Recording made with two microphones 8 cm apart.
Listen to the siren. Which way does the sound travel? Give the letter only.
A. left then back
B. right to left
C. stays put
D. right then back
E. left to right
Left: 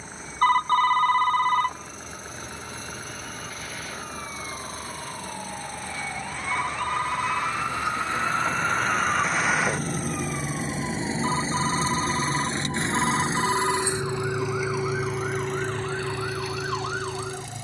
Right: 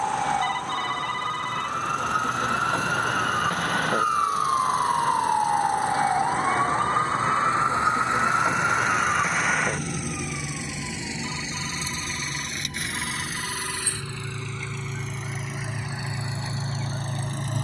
B.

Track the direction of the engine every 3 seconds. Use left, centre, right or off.
left, left, left, left, left, right.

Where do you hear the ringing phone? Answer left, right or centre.
left.